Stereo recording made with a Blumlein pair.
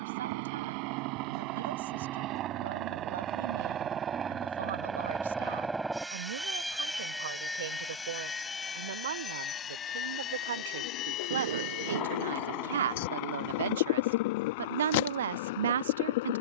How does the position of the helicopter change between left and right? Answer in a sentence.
In this clip you hear the helicopter travel towards the left.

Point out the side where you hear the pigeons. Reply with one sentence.
In this clip you hear the pigeons on the left.